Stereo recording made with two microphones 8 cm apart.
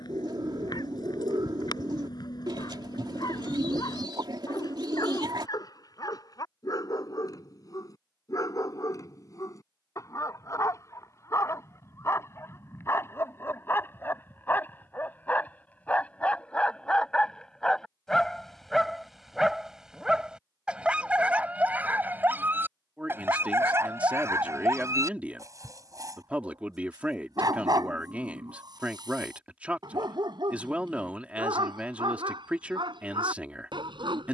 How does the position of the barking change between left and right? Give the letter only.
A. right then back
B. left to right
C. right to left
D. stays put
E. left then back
B.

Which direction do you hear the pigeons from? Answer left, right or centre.
right.